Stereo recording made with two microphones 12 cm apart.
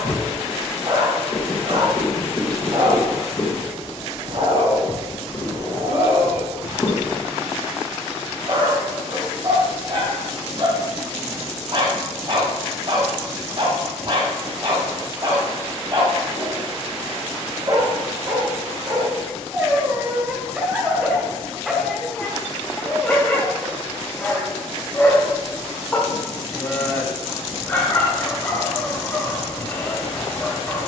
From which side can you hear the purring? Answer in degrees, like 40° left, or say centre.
30° left.